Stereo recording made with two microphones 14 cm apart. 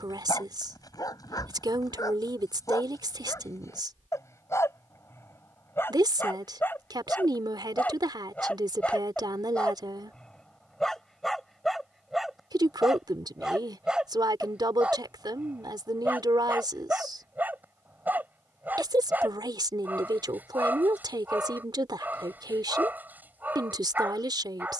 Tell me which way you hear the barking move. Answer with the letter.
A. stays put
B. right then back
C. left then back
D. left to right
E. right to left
D.